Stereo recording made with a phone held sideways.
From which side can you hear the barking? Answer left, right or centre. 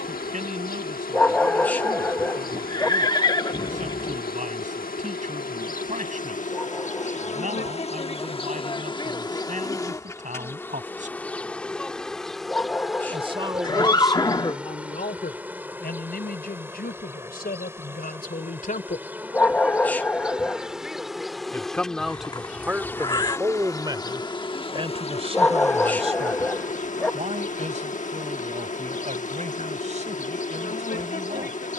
centre.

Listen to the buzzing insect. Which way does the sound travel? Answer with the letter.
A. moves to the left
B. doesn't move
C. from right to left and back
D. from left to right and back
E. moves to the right
D.